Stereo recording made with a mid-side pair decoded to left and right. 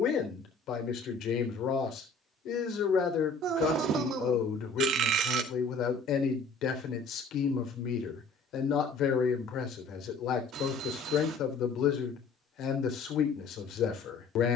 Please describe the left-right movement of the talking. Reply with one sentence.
You can hear the talking stay put.